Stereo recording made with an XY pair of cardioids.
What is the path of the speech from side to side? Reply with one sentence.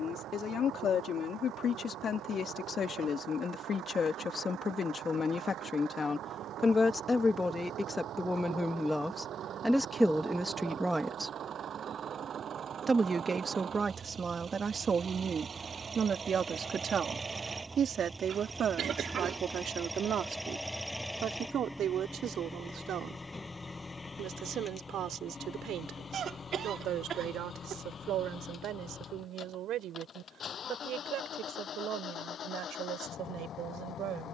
You can hear the speech move from left to right.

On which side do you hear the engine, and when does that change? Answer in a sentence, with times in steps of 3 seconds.
In this clip you hear the engine on the right from 0 s, in the centre from 18 s and on the left from 24 s.